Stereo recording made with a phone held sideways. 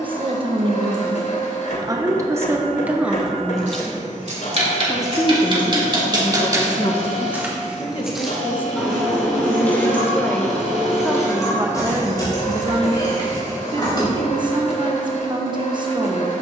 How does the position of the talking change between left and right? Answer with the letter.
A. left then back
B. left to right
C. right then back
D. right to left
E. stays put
A.